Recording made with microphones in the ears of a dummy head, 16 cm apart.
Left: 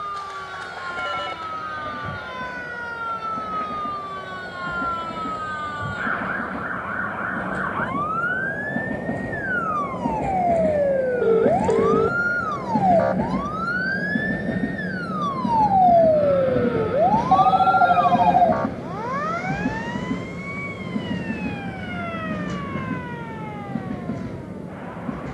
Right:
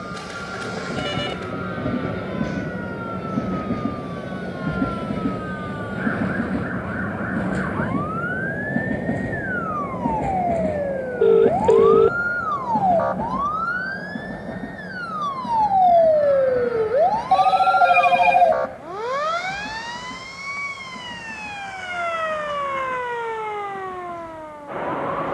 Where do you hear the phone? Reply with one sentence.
You can hear the phone on the right.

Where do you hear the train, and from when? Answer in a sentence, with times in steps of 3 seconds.
In this clip you hear the train on the right from 0 s, in the centre from 9 s and on the left from 12 s.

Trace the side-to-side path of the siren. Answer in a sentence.
In this clip you hear the siren travel towards the right.